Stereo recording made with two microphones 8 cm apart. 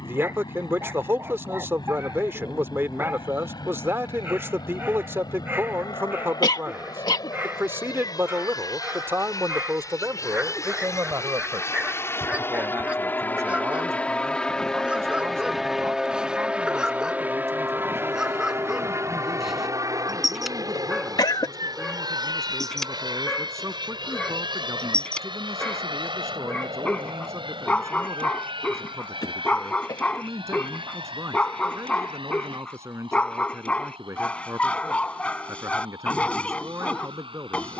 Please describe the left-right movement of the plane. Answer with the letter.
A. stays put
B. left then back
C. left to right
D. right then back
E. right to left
C.